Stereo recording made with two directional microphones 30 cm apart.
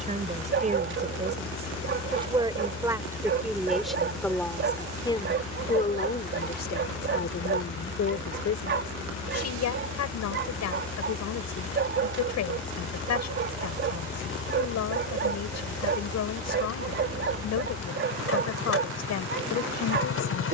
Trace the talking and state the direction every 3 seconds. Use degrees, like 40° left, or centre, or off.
20° right, 10° left, 40° left, 70° left, 70° left, 70° left, 70° left.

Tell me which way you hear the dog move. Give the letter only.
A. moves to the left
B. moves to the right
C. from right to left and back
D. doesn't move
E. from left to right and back
D.